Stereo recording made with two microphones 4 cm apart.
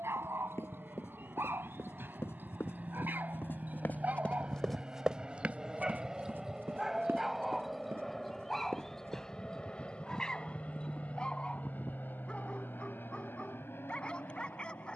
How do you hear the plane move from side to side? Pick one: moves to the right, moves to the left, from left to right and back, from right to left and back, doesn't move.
moves to the left.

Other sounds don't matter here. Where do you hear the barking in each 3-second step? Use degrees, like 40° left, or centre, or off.
60° right, 40° right, 10° right, 10° left, 20° left.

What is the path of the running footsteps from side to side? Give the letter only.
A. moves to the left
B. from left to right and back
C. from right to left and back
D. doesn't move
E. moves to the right
E.